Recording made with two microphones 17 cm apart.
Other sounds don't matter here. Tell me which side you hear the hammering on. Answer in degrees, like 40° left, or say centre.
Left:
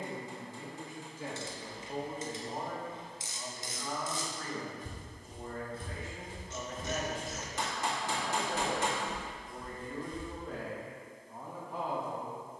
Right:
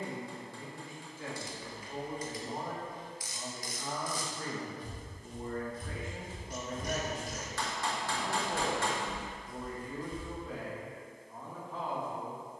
20° left.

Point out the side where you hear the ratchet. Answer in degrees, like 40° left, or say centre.
30° left.